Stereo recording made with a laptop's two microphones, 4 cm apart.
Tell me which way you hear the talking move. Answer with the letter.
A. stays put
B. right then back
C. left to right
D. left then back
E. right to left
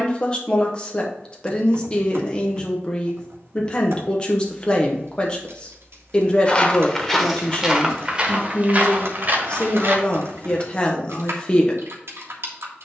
A.